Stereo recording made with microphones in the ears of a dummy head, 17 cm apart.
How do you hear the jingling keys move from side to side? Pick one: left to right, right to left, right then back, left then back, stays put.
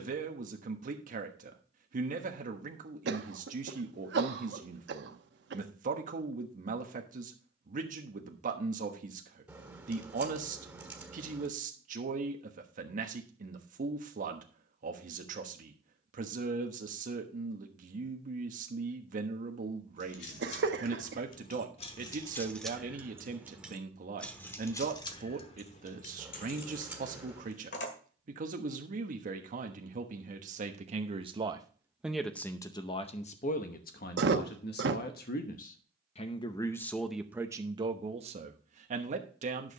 right then back.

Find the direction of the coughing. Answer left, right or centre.
right.